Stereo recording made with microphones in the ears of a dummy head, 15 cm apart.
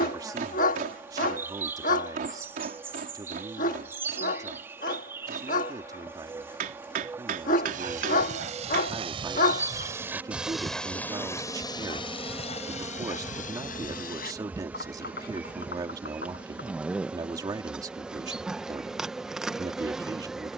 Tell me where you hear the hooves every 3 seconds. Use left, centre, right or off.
off, off, right, centre, left, left, off.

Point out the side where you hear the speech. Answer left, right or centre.
right.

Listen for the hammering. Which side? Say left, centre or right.
right.